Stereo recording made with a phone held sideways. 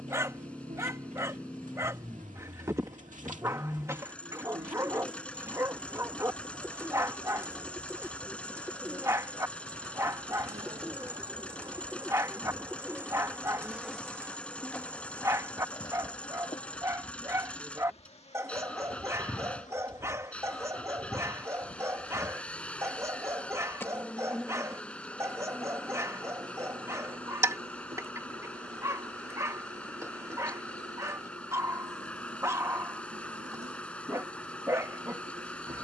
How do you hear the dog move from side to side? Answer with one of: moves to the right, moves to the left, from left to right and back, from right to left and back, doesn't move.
doesn't move.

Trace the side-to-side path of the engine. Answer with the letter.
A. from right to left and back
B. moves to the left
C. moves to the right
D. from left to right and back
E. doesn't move
E.